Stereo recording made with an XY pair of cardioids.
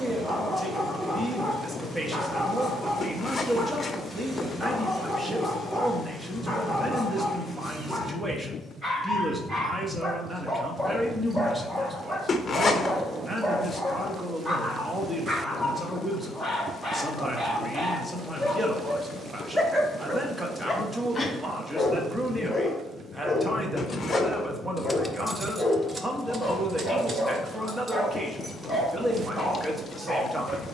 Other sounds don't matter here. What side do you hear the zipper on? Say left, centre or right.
left.